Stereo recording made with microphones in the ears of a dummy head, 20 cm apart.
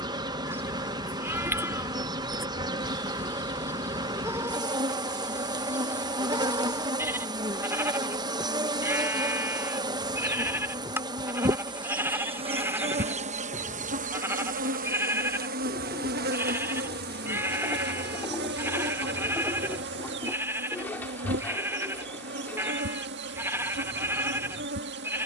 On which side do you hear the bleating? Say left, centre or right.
centre.